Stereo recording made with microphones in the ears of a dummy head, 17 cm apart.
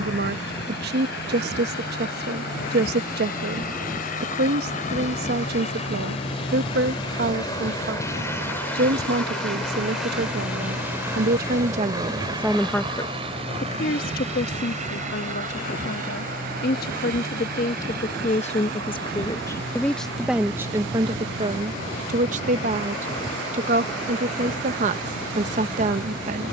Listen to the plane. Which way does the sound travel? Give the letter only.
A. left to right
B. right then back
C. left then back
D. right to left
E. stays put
A.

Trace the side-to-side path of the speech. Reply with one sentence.
You can hear the speech move from right to left and back again.